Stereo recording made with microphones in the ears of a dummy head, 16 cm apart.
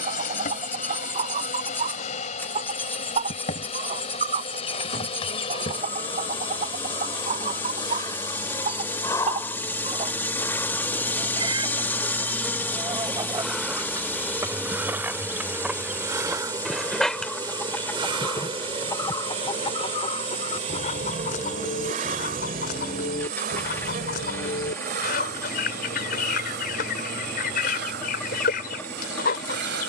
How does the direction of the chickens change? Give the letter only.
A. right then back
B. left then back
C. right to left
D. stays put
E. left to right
C.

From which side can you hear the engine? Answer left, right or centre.
centre.